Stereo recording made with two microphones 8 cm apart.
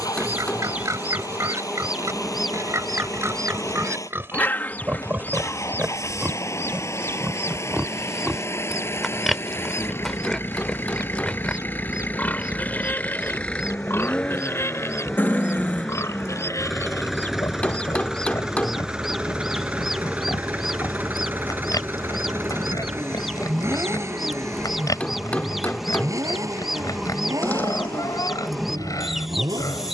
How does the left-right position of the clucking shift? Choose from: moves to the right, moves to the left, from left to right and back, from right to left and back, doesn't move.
from right to left and back.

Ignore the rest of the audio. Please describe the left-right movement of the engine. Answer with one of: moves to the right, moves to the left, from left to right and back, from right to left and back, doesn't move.
moves to the right.